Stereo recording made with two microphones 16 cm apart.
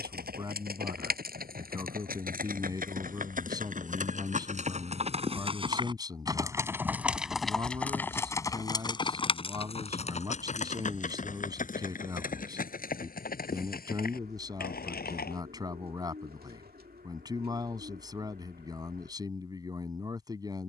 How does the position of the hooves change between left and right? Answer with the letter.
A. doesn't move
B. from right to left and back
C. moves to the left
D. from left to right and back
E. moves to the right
C.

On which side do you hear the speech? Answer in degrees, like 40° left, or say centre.
20° right.